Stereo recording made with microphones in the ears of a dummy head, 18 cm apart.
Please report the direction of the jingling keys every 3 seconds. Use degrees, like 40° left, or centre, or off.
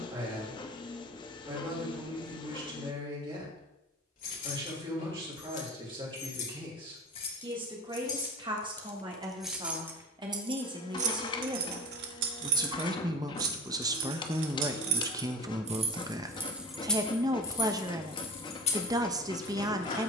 off, 40° left, 30° left, 30° right, 70° right, 10° right, 30° left.